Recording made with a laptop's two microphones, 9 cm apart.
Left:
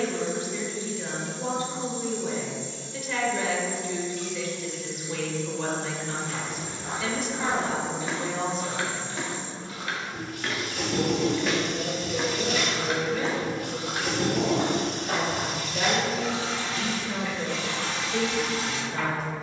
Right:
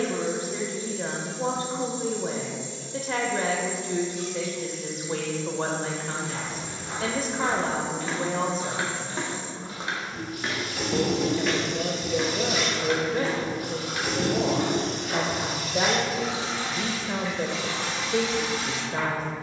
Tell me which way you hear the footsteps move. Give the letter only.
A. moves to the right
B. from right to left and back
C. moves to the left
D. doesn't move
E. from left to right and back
E.